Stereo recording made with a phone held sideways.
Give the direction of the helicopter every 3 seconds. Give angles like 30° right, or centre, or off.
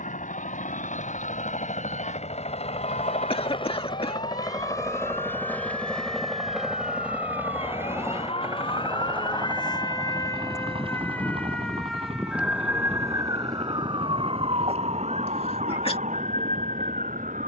60° left, 30° left, 10° right, 30° right, 40° right, 50° right.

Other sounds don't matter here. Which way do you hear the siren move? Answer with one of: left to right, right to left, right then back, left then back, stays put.
left to right.